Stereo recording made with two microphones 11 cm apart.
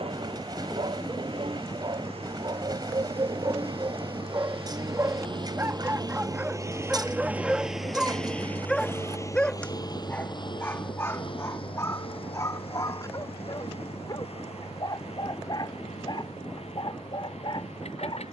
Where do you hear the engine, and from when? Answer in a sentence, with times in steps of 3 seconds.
You can hear the engine on the right from 0 s, in the centre from 6 s and on the left from 9 s.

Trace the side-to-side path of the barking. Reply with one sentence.
In this clip you hear the barking move from right to left.